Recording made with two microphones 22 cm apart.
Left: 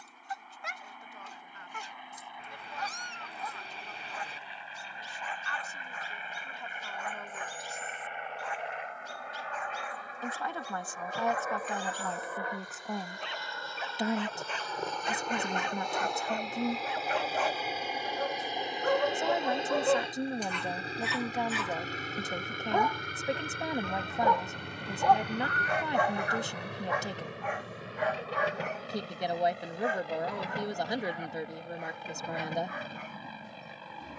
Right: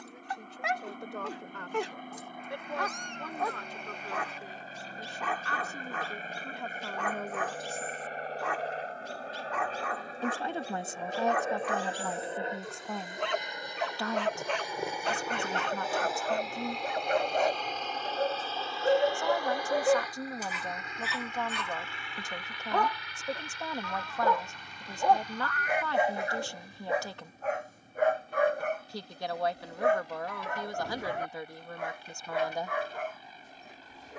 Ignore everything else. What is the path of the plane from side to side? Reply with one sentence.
In this clip you hear the plane move from right to left.